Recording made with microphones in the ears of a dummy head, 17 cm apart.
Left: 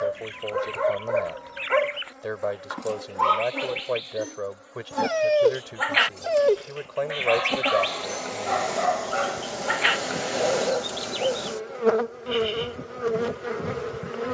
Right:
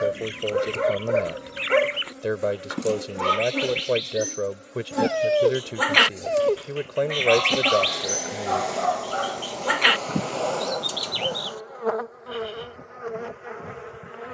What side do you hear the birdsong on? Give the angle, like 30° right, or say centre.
50° right.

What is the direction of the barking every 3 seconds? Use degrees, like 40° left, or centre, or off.
30° right, 10° right, 20° left, 30° left, 30° left.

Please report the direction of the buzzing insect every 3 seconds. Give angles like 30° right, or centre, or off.
40° right, 30° right, 10° right, 20° left, 40° left.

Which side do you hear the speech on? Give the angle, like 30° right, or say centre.
40° right.